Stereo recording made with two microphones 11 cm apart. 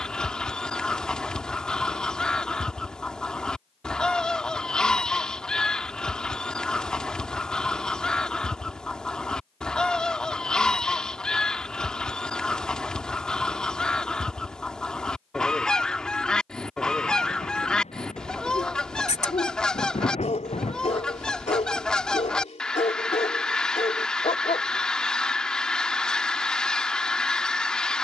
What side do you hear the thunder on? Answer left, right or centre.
left.